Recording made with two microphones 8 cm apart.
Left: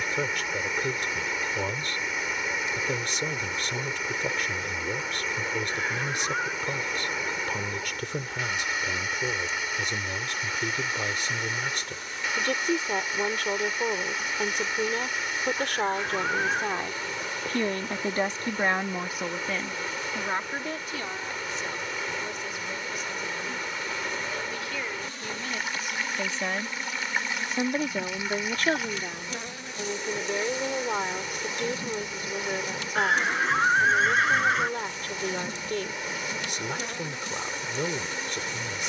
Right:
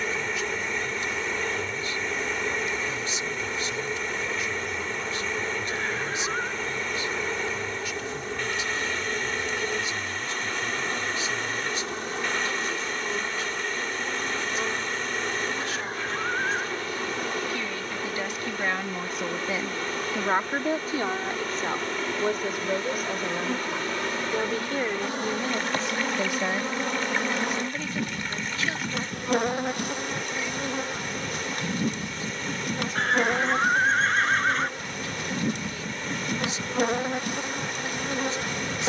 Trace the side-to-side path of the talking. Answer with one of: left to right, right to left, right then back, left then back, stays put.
right then back.